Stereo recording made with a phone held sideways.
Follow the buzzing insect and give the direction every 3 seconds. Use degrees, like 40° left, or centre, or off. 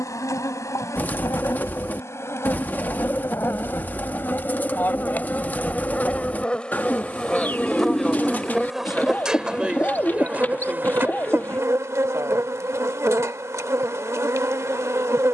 20° left, 20° left, centre, 10° right, 20° right.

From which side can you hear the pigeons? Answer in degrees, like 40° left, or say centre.
10° left.